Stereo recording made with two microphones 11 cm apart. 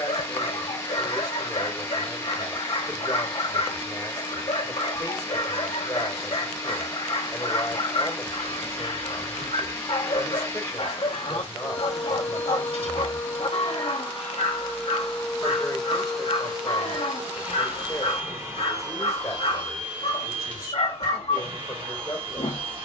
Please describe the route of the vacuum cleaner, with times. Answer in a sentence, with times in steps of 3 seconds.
In this clip you hear the vacuum cleaner on the left from 0 s, in the centre from 15 s and on the right from 18 s.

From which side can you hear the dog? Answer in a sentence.
In this clip you hear the dog on the left.